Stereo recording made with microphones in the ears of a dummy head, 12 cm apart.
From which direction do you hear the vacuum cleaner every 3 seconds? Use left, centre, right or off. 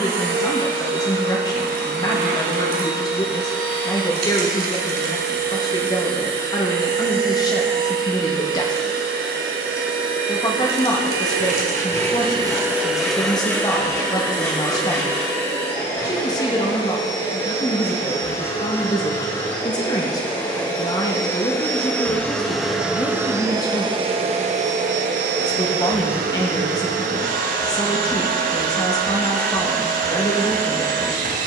right, right, right, right, centre, left, left, centre, right, right, right.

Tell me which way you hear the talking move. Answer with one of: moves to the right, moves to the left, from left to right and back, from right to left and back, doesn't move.
doesn't move.